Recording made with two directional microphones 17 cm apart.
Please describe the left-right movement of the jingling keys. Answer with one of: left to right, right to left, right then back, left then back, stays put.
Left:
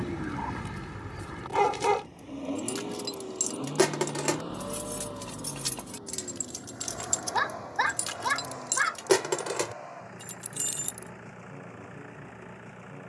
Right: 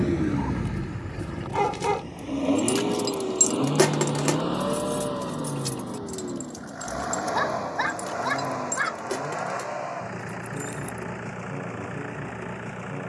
right to left.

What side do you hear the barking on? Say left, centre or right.
centre.